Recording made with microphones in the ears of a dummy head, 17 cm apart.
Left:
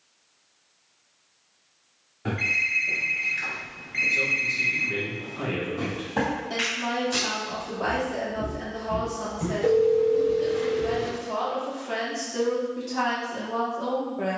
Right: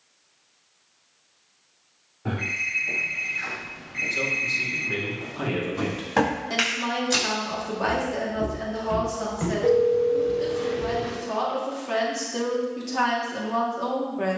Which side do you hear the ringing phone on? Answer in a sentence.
You can hear the ringing phone on the left.